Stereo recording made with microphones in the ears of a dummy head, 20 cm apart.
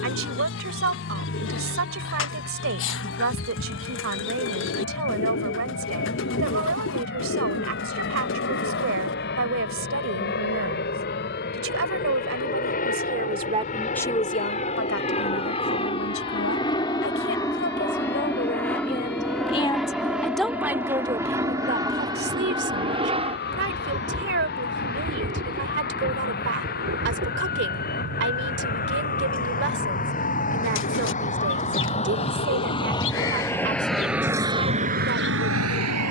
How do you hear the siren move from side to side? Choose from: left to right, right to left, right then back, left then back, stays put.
left to right.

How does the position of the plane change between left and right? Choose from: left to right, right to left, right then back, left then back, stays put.
left to right.